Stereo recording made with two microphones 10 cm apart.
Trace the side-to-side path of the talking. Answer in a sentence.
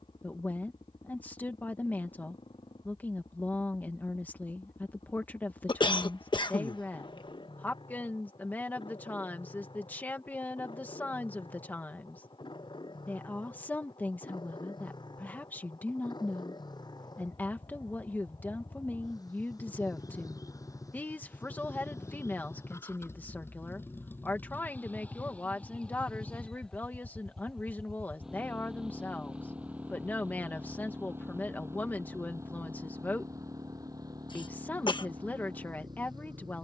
In this clip you hear the talking stay in one place.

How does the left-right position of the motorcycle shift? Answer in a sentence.
In this clip you hear the motorcycle move to the right.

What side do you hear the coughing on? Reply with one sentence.
You can hear the coughing on the left.